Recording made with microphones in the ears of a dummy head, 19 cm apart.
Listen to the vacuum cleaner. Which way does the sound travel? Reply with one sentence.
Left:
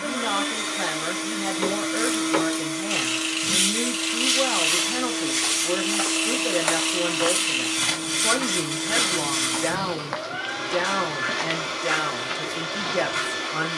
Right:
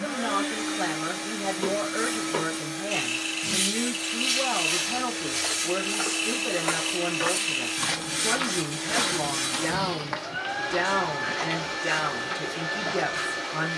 You can hear the vacuum cleaner stay in one place.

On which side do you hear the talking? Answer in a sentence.
You can hear the talking in the centre.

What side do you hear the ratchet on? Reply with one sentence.
You can hear the ratchet on the left.